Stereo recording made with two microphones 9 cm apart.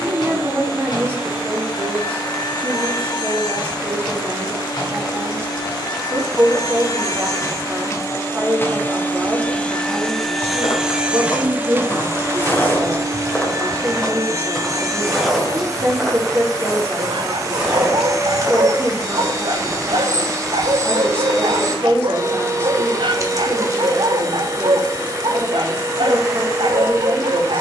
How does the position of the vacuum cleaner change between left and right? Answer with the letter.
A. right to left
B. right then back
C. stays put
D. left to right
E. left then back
D.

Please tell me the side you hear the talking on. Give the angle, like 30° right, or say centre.
30° right.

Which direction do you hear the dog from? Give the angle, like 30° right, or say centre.
70° right.